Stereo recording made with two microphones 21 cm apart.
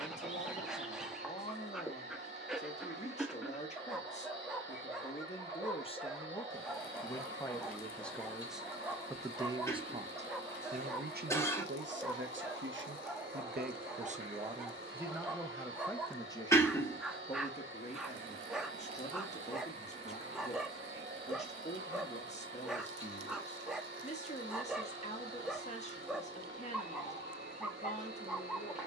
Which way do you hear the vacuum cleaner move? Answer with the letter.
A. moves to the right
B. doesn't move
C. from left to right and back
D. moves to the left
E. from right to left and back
B.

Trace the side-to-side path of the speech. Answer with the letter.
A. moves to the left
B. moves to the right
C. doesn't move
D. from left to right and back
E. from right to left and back
D.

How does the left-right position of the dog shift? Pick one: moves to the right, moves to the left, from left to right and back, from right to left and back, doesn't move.
doesn't move.